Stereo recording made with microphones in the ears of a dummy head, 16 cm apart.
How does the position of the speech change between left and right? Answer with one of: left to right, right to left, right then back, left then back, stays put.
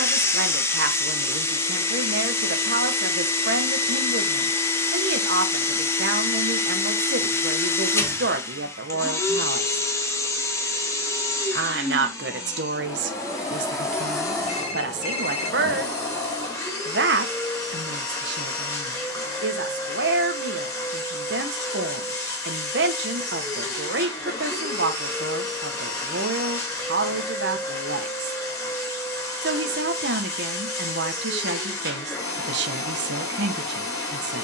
stays put.